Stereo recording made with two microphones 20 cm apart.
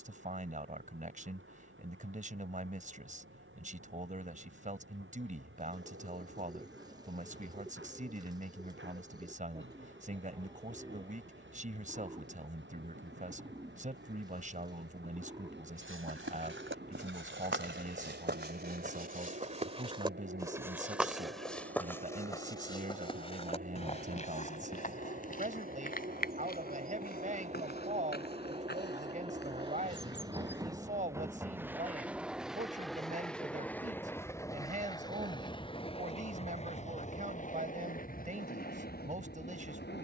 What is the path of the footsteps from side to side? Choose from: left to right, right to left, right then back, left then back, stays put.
right to left.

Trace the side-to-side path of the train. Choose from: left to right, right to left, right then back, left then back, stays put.
right to left.